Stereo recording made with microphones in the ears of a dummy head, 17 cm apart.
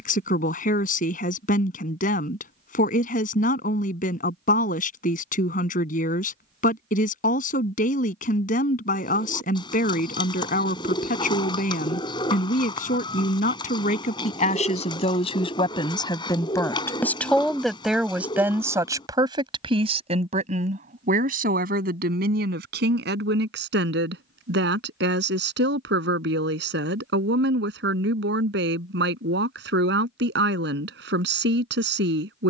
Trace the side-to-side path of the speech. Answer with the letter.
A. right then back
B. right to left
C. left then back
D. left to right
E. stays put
D.